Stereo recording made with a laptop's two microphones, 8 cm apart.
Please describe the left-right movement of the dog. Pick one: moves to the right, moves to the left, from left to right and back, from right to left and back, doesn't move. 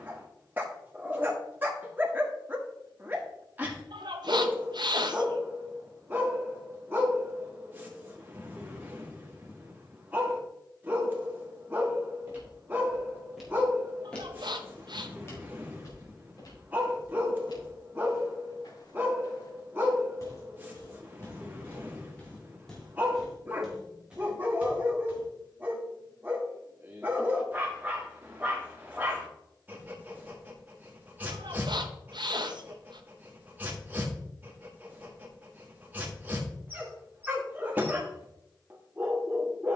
doesn't move.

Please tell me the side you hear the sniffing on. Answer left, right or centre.
right.